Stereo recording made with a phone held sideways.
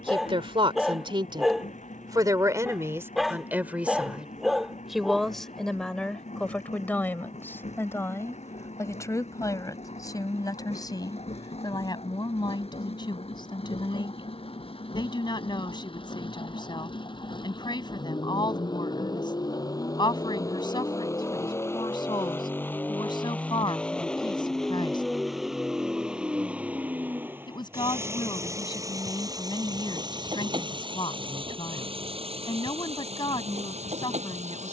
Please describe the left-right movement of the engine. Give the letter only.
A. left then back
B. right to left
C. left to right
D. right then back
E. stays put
C.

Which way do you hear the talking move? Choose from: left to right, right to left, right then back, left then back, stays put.
right to left.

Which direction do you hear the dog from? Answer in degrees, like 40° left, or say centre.
centre.